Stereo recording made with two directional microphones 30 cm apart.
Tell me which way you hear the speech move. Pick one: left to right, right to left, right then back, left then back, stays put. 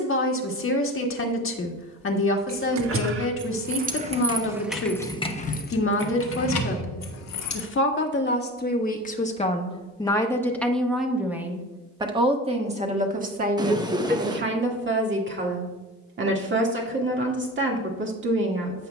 left to right.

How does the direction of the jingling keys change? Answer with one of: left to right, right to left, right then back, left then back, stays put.
right to left.